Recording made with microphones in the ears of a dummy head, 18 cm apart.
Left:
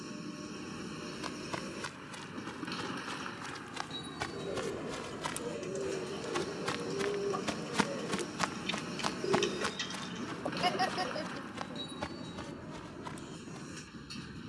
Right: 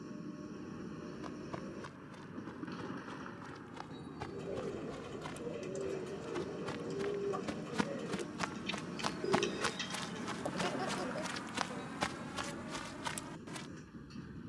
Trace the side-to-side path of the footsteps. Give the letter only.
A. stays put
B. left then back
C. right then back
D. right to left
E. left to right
E.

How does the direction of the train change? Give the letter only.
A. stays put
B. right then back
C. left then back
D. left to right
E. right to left
A.